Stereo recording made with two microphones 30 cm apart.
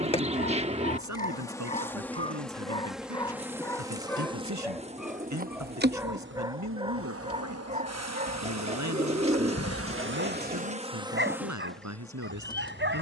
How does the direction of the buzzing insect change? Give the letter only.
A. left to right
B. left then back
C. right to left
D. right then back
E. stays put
D.